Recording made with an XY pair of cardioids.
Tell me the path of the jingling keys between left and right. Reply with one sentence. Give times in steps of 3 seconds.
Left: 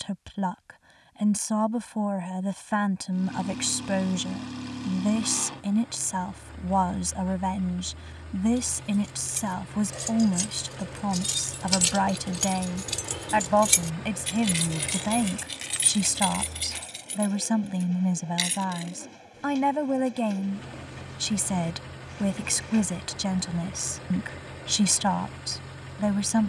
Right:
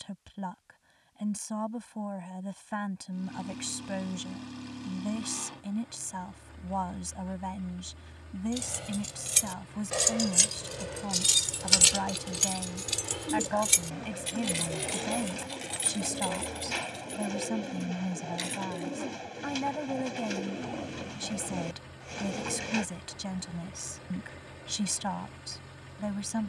In this clip you hear the jingling keys not at all from 0 s, on the right from 6 s, in the centre from 12 s, on the left from 15 s and not at all from 21 s.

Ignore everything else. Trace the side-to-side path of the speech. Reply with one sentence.
You can hear the speech stay put.